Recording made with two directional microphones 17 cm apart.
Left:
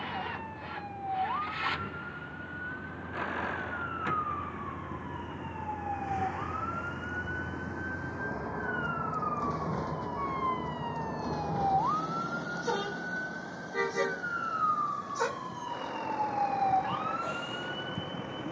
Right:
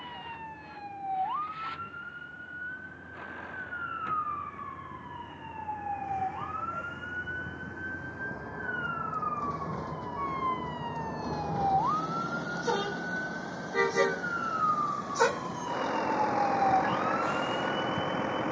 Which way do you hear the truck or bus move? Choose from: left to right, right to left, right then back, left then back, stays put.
left to right.